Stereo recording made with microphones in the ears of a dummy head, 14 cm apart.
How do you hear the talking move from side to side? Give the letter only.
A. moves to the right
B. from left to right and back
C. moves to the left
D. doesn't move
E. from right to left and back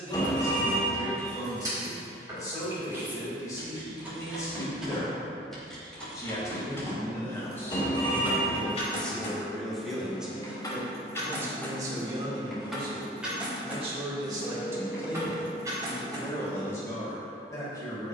B.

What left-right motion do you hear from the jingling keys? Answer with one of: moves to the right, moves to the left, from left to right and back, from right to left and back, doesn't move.
from right to left and back.